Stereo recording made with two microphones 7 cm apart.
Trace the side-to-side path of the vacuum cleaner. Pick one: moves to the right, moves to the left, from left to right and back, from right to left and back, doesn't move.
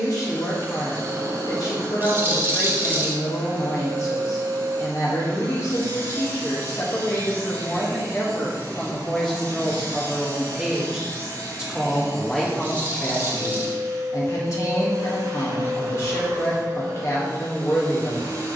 doesn't move.